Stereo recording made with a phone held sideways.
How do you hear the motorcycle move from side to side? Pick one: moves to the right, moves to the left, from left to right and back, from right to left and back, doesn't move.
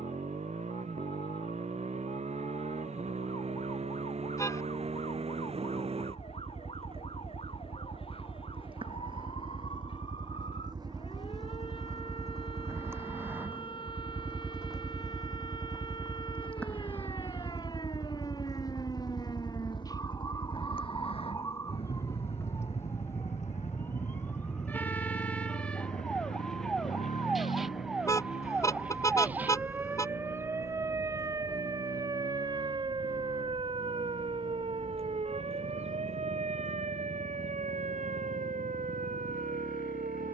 moves to the left.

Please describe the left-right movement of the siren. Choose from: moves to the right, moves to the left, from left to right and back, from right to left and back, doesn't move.
moves to the right.